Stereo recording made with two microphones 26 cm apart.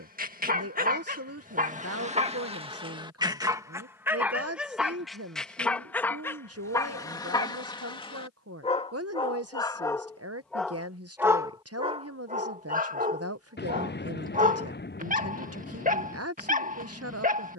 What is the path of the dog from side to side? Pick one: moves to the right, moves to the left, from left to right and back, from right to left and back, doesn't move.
from right to left and back.